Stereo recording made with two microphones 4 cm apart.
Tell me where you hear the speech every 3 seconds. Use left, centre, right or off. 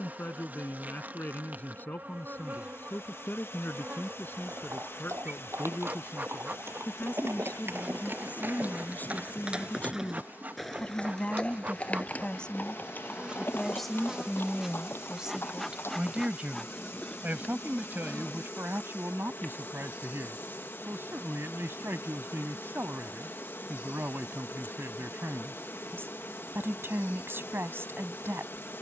left, left, left, left, centre, right, right, right, right, right.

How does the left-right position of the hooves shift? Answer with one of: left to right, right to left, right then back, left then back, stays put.
right to left.